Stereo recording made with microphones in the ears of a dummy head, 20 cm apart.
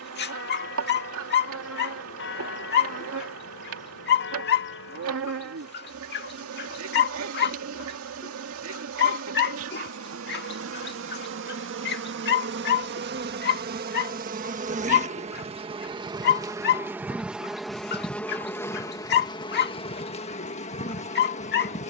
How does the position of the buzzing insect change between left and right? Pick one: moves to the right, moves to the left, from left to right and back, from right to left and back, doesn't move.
moves to the left.